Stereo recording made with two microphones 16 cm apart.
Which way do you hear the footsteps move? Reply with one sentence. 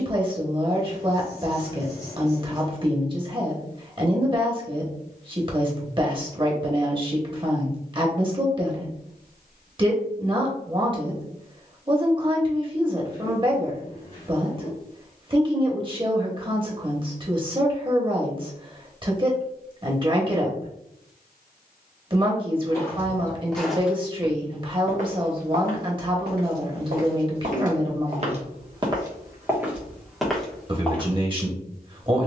In this clip you hear the footsteps move from left to right and back again.